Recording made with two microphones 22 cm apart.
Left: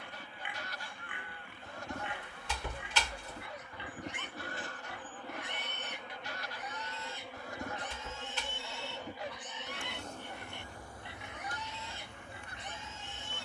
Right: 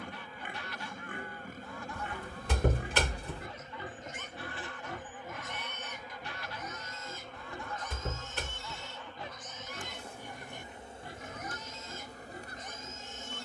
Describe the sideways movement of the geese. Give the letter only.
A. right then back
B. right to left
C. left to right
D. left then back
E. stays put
E.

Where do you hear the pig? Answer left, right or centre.
right.